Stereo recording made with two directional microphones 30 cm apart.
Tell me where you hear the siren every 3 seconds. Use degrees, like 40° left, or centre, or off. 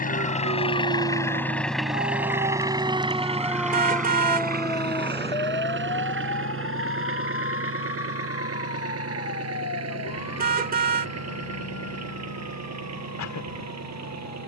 30° right, 10° left, 40° left, 50° left, 60° left.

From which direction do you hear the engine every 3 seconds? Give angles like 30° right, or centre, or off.
10° left, 30° right, 50° right, 60° right, 60° right.